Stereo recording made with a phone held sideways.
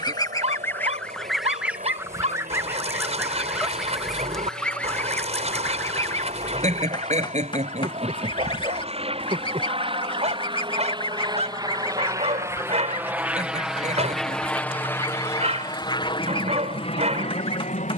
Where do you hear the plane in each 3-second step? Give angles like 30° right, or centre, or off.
60° right, 50° right, 50° right, 30° right, 10° right, 30° left.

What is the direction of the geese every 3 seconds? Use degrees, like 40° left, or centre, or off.
centre, centre, 30° left, 30° left, 30° left, 30° left.